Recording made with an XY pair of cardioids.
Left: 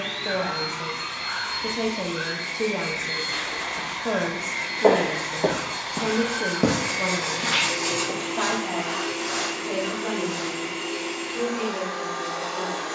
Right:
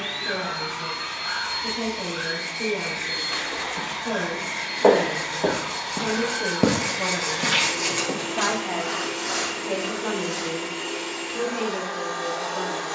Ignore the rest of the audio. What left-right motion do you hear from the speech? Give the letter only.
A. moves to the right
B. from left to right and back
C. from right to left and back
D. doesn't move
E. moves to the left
A.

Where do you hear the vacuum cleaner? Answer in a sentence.
You can hear the vacuum cleaner on the right.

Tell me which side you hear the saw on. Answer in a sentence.
You can hear the saw on the right.